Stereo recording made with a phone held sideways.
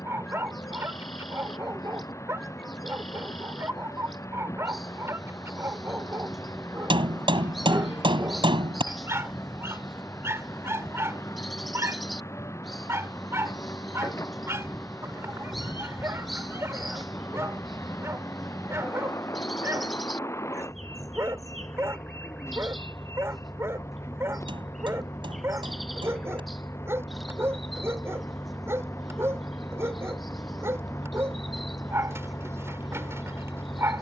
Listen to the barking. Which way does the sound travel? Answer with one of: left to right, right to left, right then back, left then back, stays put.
stays put.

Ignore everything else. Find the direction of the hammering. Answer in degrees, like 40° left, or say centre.
40° right.